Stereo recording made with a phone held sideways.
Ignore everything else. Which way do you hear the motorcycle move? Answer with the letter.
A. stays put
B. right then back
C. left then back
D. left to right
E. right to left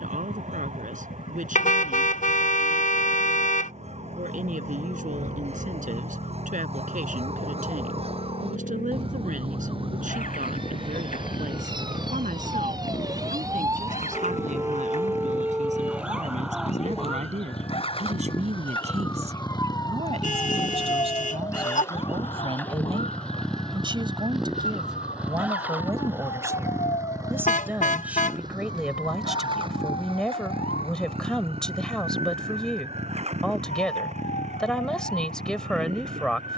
D.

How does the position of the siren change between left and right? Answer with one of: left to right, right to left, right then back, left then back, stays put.
right to left.